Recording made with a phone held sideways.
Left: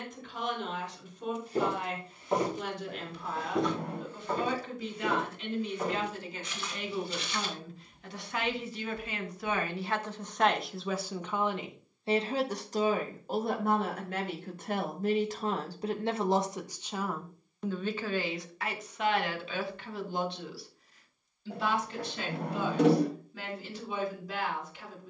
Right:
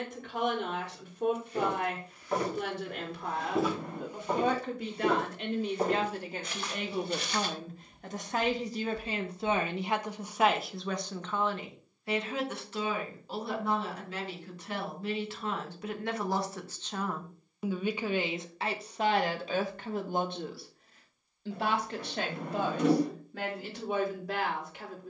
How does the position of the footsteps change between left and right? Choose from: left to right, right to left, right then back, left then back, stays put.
left to right.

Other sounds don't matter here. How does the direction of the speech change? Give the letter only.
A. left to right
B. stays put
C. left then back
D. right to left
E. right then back
C.